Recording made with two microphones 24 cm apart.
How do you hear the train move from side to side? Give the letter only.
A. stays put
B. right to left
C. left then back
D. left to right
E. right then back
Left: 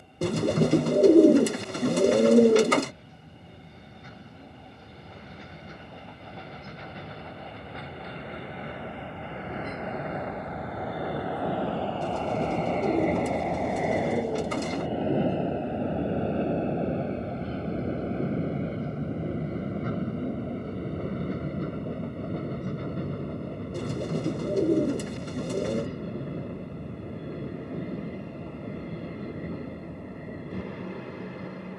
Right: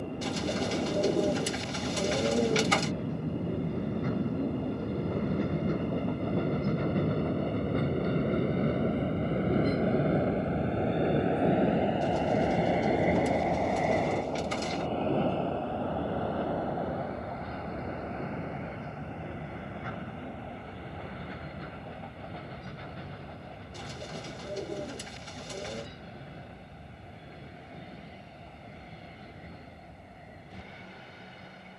B.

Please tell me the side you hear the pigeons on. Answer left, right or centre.
left.